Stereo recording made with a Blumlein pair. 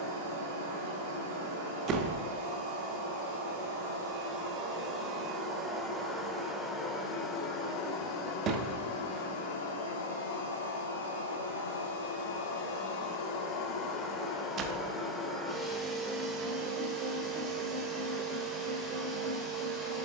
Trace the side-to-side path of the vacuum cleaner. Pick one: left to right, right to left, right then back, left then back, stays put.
left then back.